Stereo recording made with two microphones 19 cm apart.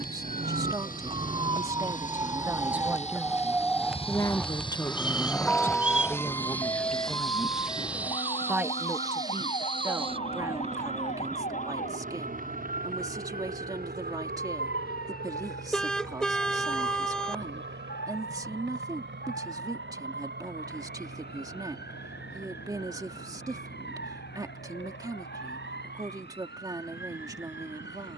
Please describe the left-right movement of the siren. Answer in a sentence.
In this clip you hear the siren move to the left.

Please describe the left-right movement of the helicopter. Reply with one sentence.
In this clip you hear the helicopter move to the right.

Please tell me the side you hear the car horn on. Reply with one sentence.
In this clip you hear the car horn in the centre.